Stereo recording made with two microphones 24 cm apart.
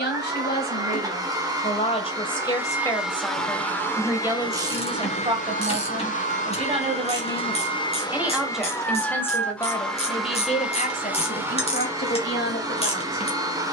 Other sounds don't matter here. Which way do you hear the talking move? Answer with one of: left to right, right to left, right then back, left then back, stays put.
right then back.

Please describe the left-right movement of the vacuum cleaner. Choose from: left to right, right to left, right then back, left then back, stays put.
left then back.